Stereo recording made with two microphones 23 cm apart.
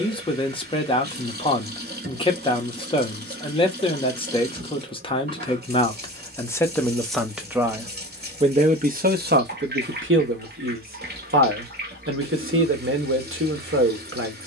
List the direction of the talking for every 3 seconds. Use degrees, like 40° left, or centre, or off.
20° left, 20° left, 10° right, 60° right, 60° right.